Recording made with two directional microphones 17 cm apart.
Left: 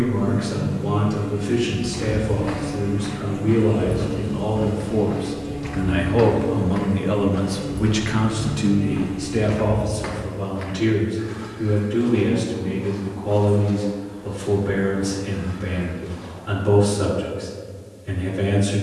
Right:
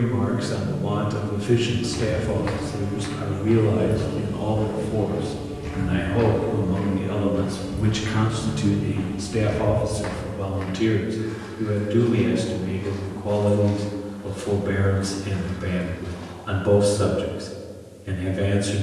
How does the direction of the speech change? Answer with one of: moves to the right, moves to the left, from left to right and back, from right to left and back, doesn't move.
from right to left and back.